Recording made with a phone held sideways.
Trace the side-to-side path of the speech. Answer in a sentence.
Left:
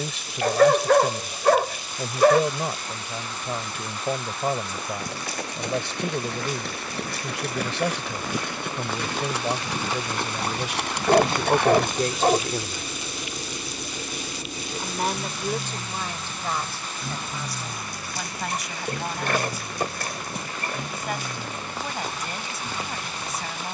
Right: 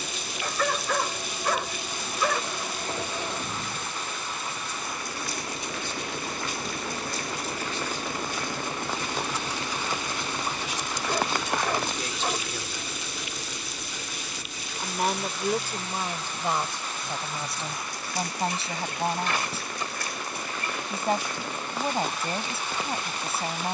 You can hear the speech move from left to right.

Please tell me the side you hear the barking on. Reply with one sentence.
You can hear the barking on the left.